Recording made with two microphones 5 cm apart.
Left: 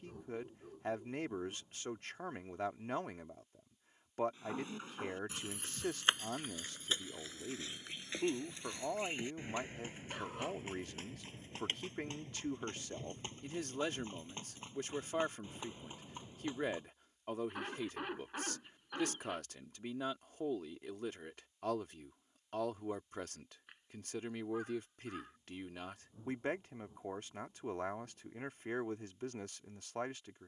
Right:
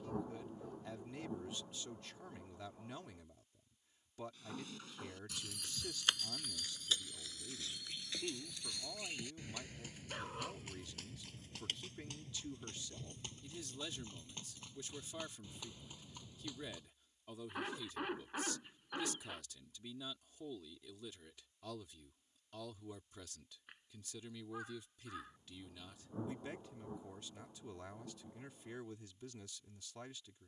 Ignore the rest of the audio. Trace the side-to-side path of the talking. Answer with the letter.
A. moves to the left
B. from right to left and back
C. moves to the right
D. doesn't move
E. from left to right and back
D.